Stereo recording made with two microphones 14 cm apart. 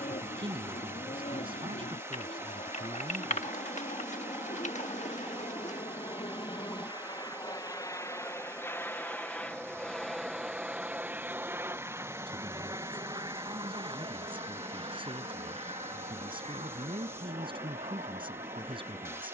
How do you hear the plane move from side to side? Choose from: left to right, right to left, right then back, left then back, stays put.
left to right.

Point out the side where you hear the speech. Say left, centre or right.
right.